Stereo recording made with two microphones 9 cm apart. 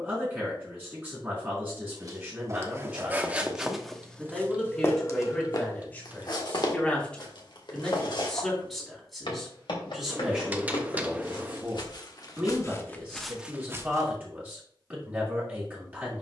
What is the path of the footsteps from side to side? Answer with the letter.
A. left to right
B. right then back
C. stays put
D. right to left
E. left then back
E.